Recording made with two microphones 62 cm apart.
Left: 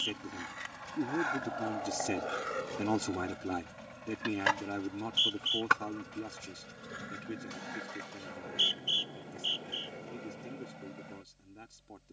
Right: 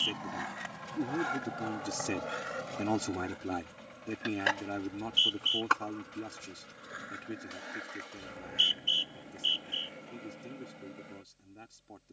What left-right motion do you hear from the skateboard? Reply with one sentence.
You can hear the skateboard travel towards the left.